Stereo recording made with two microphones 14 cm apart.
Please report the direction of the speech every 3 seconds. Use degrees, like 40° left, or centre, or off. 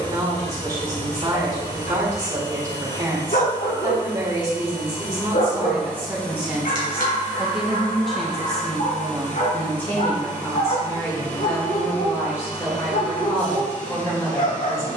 30° right, 20° right, centre, 20° left, 20° left.